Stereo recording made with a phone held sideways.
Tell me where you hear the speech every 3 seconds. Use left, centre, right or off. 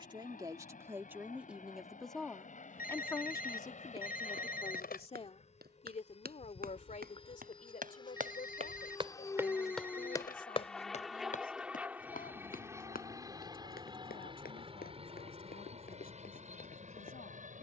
centre, left, left, left, left, left.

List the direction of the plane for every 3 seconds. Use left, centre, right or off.
left, left, left, centre, right, right.